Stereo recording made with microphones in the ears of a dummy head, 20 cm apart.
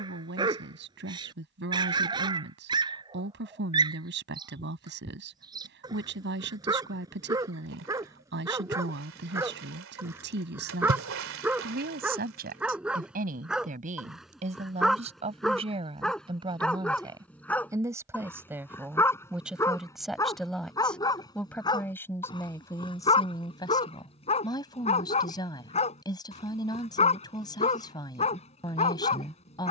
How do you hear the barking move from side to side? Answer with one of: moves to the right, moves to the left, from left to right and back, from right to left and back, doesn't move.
moves to the left.